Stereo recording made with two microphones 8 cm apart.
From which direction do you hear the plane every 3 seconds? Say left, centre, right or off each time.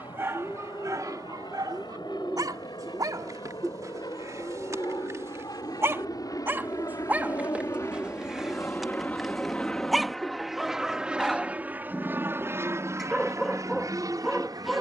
left, left, left, centre, right.